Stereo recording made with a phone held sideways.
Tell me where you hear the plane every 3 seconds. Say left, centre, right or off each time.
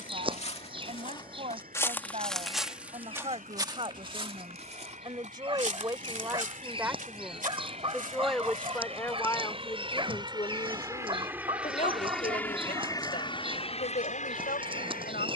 right, right, right, right, left.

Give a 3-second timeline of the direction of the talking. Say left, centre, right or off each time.
right, right, centre, left, left.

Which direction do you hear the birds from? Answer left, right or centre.
right.